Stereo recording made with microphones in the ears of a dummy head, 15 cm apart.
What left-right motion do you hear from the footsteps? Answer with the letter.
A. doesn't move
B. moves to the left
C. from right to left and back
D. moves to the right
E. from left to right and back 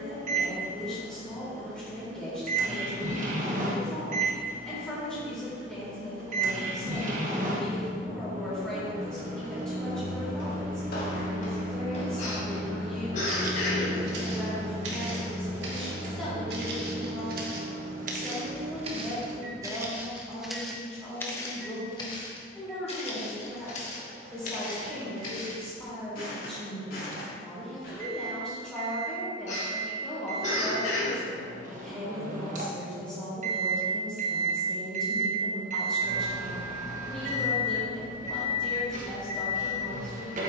E.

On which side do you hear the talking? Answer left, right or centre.
centre.